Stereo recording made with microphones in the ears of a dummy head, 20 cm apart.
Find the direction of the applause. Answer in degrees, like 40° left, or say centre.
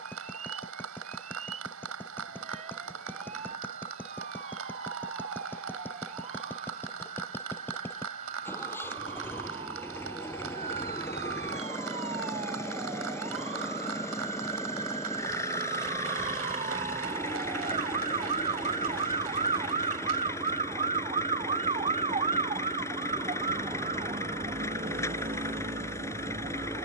70° right.